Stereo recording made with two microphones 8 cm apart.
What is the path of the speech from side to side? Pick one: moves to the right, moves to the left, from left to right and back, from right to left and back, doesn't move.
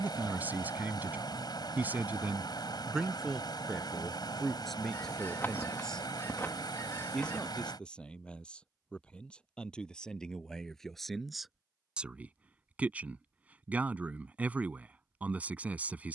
from right to left and back.